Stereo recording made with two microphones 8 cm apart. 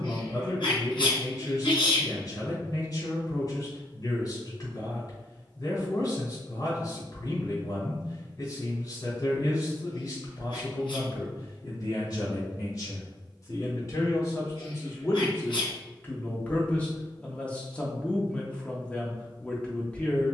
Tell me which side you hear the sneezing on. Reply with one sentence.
In this clip you hear the sneezing on the left.